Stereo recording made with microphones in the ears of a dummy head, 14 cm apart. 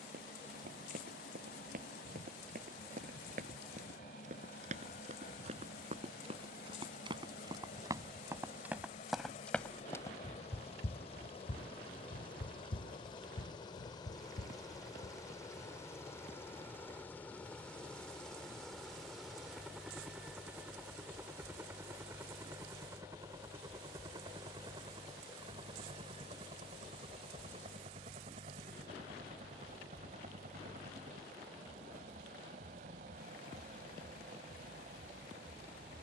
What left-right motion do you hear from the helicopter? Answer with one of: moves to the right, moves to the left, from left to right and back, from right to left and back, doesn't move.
moves to the right.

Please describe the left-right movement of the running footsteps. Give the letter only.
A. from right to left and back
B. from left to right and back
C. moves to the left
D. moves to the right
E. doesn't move
C.